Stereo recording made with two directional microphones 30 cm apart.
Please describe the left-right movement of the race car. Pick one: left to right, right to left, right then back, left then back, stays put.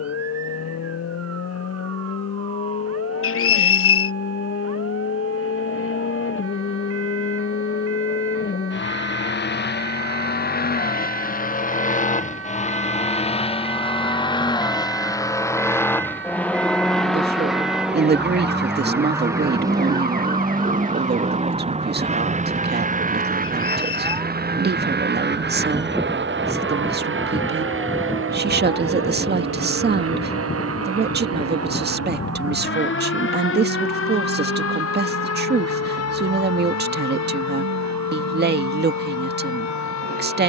left to right.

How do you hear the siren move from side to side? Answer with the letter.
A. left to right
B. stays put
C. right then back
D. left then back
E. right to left
E.